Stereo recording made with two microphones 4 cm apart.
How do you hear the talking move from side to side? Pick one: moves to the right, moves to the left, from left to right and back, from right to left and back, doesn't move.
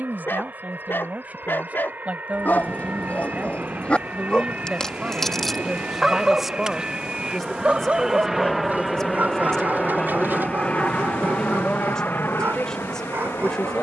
moves to the left.